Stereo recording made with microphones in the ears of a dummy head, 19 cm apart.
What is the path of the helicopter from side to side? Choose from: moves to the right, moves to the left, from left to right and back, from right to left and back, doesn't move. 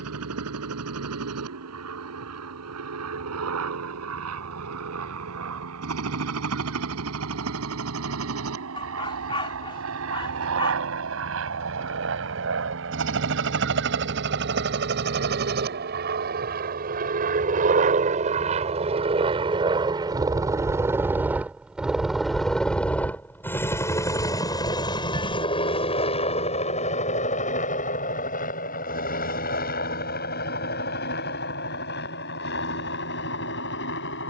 moves to the left.